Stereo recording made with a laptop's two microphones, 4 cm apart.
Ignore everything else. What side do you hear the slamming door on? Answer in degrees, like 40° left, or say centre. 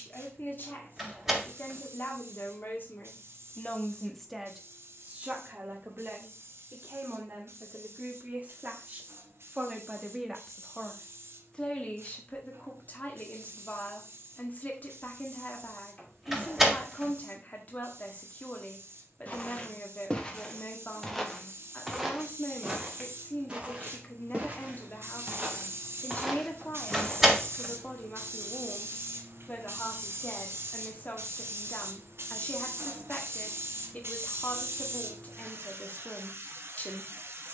10° right.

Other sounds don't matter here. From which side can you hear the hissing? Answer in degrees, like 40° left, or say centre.
70° right.